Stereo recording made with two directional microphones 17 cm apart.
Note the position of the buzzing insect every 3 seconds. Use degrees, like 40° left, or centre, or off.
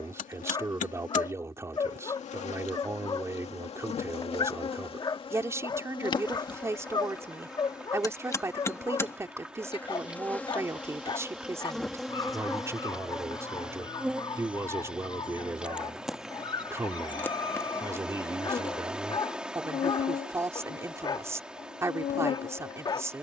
50° left, 40° left, 20° left, 10° left, centre, centre, 40° left, 50° left.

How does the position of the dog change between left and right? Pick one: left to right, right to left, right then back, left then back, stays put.
stays put.